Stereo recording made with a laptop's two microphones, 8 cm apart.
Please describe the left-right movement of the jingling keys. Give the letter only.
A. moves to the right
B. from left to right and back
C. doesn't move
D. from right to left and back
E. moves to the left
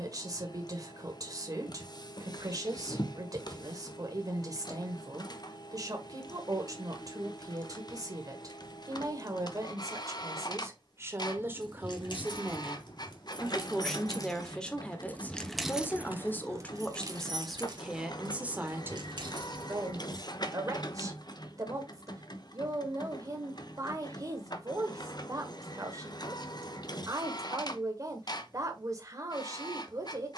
A.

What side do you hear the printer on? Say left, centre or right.
left.